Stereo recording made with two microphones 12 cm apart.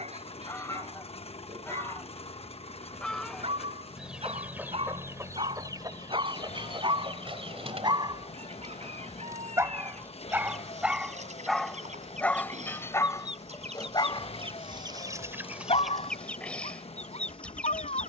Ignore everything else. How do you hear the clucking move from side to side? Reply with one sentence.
In this clip you hear the clucking move from left to right and back again.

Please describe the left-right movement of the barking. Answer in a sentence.
In this clip you hear the barking travel towards the left.